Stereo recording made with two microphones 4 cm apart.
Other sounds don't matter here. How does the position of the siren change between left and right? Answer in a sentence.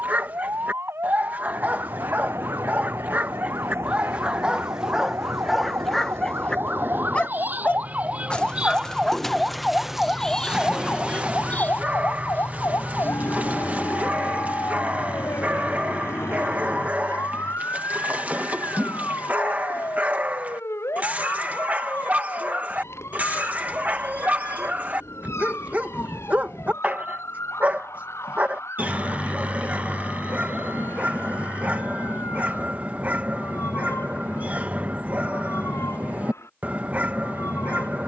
In this clip you hear the siren move to the left.